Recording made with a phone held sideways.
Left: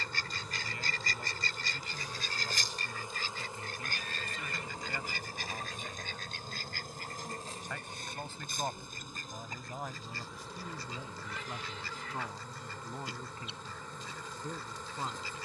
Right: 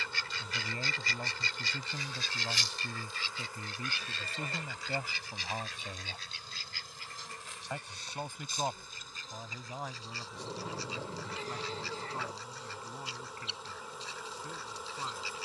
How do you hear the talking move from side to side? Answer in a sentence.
You can hear the talking move to the left.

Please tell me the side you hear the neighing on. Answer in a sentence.
In this clip you hear the neighing on the right.